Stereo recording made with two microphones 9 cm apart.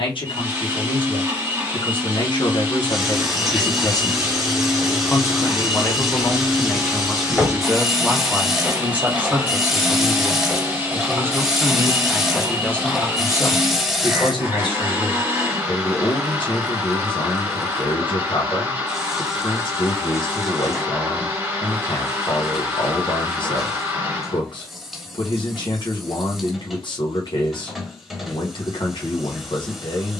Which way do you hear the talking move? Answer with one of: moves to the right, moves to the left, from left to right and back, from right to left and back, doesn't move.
from left to right and back.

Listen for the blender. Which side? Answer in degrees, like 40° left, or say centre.
30° right.